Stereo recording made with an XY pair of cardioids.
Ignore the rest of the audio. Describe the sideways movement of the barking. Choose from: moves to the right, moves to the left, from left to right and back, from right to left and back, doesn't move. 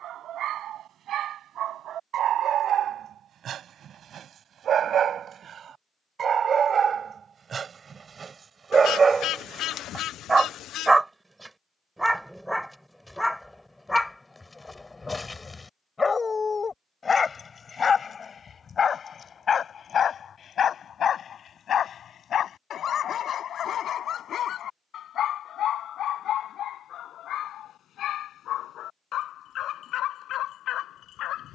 moves to the left.